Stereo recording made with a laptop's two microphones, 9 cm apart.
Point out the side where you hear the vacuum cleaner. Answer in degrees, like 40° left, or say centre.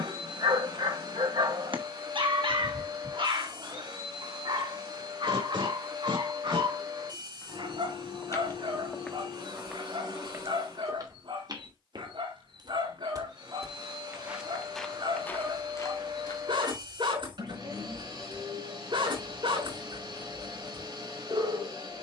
50° right.